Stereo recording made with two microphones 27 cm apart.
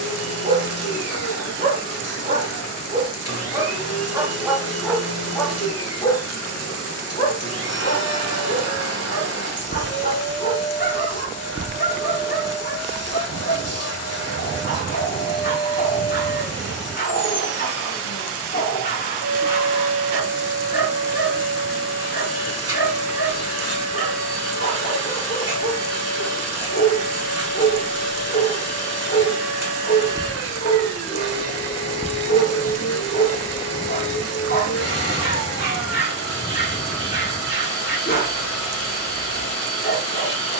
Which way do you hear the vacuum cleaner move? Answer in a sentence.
In this clip you hear the vacuum cleaner stay in one place.